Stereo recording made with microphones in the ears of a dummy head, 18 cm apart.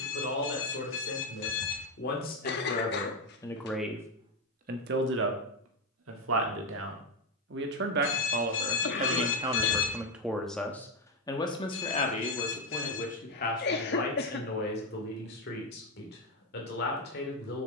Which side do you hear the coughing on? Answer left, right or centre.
left.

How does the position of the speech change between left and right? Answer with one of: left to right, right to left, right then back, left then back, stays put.
right then back.